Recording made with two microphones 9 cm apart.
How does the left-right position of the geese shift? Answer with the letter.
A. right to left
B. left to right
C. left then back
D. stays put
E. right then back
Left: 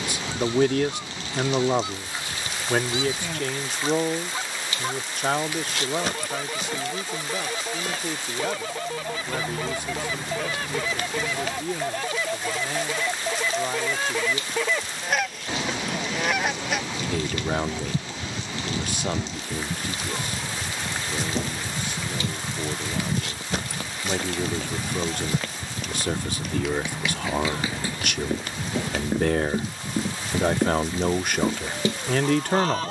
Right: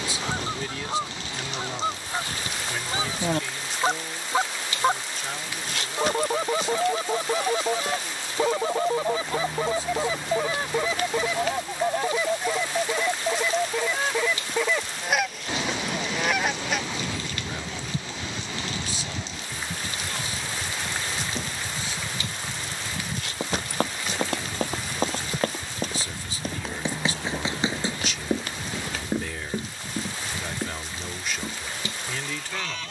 A.